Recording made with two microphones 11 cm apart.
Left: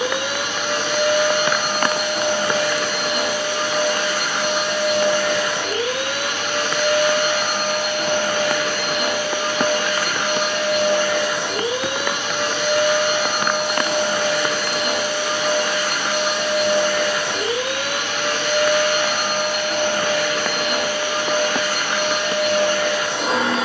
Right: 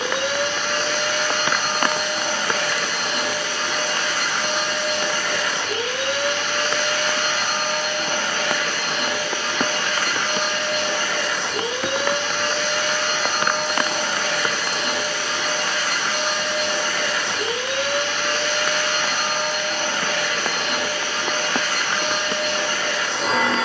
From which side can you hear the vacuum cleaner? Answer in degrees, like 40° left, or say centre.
10° left.